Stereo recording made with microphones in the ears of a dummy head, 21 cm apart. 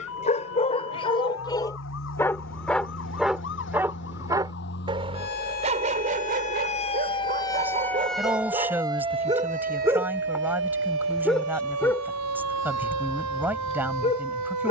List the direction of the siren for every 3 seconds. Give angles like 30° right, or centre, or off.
60° left, 50° left, 10° left, 50° right, 80° right.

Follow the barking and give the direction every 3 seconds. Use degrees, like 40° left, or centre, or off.
20° left, 20° right, 30° right, 10° right, 20° left.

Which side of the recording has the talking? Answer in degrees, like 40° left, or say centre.
10° right.